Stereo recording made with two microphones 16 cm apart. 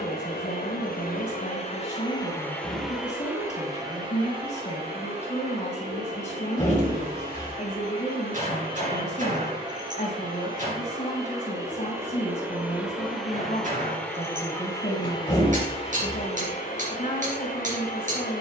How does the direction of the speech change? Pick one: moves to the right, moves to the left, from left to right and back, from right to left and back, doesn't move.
doesn't move.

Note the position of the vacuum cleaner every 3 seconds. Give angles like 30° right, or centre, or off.
40° left, 30° right, 40° right, 30° right, centre, 50° left.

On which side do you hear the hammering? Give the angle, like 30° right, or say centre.
50° right.